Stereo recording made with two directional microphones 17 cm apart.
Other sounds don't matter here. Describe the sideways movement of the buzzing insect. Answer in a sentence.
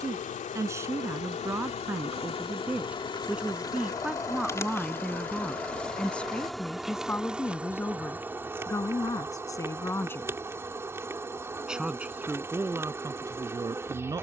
You can hear the buzzing insect travel towards the right.